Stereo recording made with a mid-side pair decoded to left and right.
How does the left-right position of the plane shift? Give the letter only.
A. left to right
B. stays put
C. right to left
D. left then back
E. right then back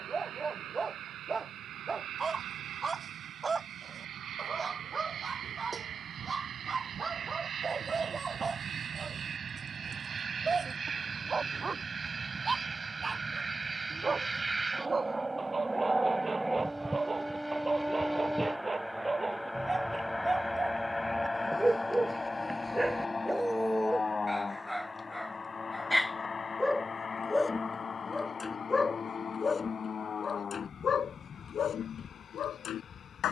C.